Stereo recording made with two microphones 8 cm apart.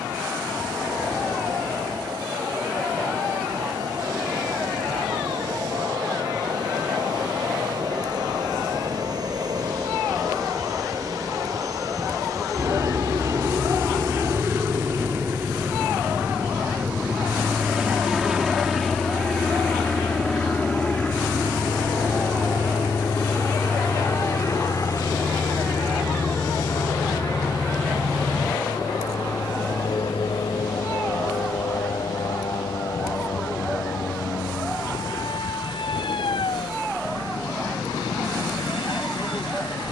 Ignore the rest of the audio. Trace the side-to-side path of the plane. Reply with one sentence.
In this clip you hear the plane go from the right side to the left.